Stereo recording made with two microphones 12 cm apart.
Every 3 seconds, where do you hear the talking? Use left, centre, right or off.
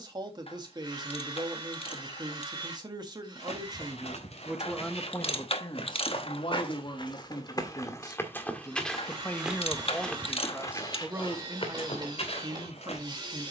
right, centre, left, centre, right.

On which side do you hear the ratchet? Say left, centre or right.
left.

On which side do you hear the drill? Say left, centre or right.
right.